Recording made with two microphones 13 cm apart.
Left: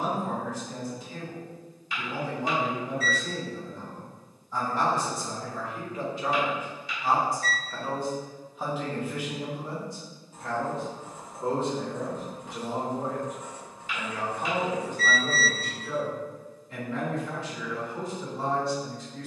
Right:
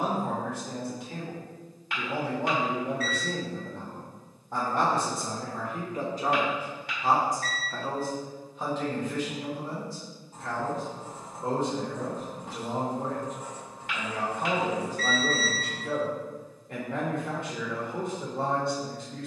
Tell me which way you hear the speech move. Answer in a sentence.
You can hear the speech go left and come back.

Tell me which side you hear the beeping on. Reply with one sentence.
In this clip you hear the beeping on the right.